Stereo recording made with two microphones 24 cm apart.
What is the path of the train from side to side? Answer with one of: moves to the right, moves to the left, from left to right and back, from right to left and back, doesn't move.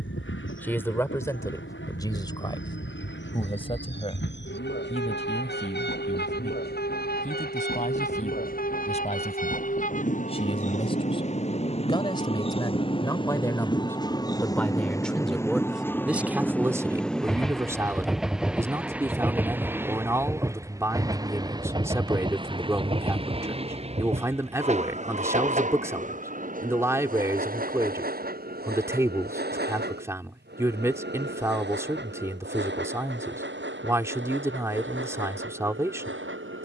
moves to the right.